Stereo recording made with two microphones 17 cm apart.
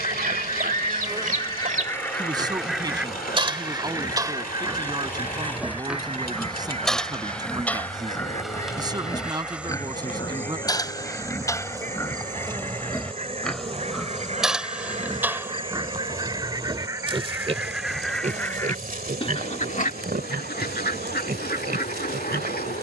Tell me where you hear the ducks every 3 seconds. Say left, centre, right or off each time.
left, right, right, right, right, right, left, left.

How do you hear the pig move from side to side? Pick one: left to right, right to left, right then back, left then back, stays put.
left then back.